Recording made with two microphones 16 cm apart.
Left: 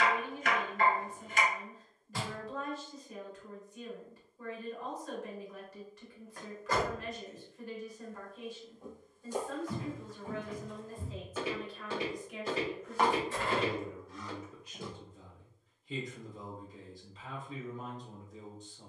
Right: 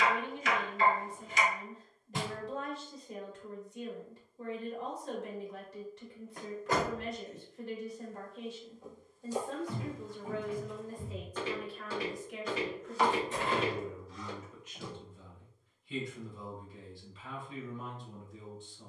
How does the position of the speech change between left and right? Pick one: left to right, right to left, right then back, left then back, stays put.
right to left.